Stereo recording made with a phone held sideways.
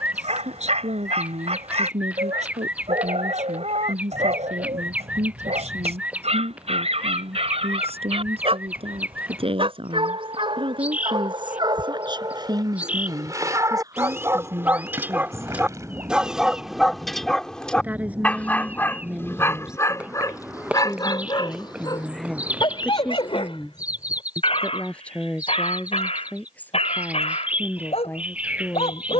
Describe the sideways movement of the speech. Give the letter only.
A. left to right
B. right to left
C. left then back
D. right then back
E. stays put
B.